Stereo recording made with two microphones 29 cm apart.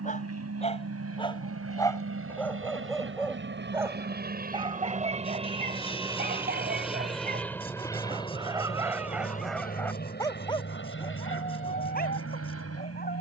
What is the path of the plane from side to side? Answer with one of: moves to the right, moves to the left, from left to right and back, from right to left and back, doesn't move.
moves to the left.